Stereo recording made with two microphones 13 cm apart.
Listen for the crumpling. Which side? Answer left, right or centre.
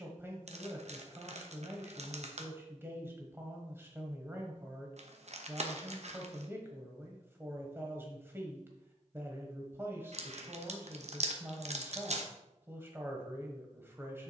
right.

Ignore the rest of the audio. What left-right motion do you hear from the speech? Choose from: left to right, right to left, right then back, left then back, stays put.
stays put.